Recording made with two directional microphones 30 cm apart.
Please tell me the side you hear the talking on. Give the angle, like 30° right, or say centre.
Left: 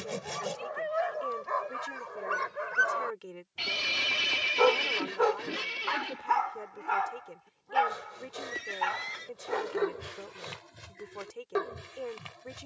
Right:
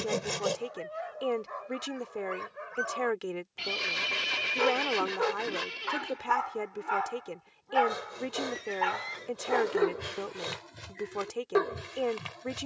60° right.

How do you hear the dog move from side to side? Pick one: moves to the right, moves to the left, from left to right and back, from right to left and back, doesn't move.
moves to the right.